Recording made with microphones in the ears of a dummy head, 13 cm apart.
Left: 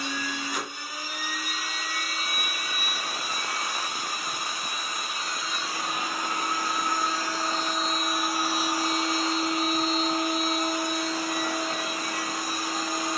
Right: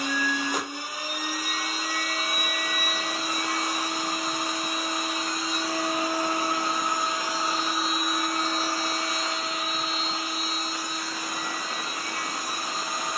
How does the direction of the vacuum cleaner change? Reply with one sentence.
You can hear the vacuum cleaner go from the right side to the left.